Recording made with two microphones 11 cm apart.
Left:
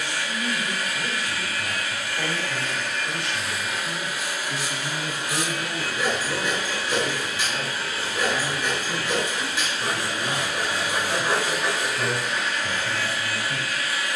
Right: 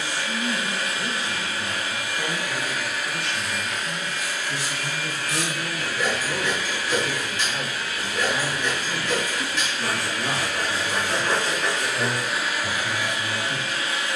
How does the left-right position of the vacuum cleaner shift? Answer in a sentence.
In this clip you hear the vacuum cleaner go left and come back.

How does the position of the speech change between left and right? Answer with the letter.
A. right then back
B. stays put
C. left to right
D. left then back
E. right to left
C.